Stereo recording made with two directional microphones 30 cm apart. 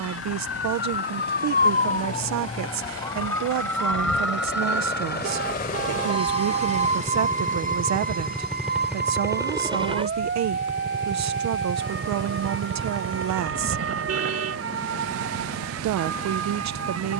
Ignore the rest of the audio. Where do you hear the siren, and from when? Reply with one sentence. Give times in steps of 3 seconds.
You can hear the siren on the left from 0 s, in the centre from 3 s and on the right from 6 s.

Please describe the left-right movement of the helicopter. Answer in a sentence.
In this clip you hear the helicopter travel towards the right.